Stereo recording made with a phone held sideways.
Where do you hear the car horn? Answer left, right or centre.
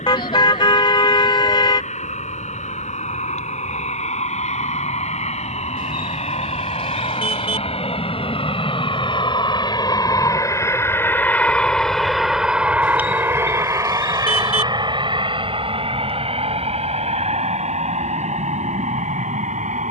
left.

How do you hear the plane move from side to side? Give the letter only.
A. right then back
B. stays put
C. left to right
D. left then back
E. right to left
C.